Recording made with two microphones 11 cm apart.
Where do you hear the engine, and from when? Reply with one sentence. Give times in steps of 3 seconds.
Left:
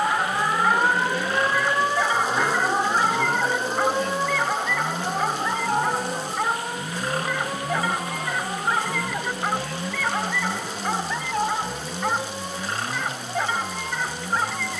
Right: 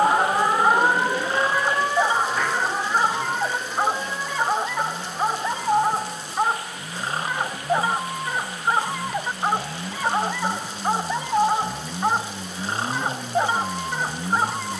You can hear the engine on the left from 0 s, in the centre from 9 s and on the right from 12 s.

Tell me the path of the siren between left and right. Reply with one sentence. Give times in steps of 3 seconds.
You can hear the siren in the centre from 0 s and on the left from 3 s.